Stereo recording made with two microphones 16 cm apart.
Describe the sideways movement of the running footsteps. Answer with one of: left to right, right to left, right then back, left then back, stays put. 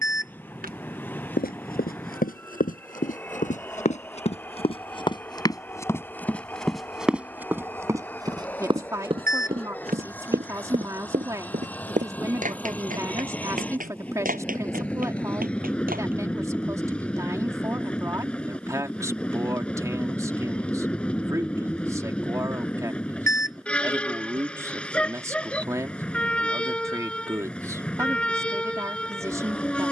left to right.